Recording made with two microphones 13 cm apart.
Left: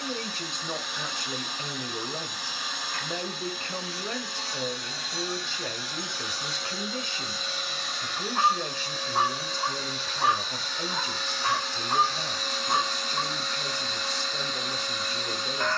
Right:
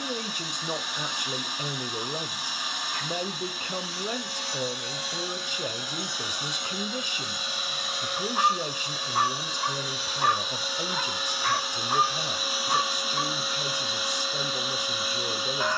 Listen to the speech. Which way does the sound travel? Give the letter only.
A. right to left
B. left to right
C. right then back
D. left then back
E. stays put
E.